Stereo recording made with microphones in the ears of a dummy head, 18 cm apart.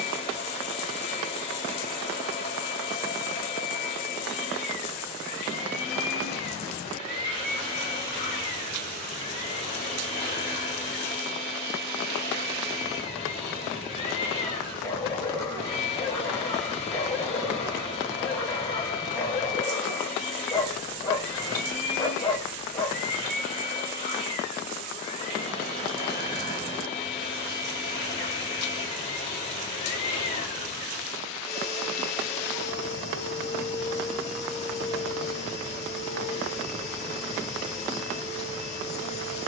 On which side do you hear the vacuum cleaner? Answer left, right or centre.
left.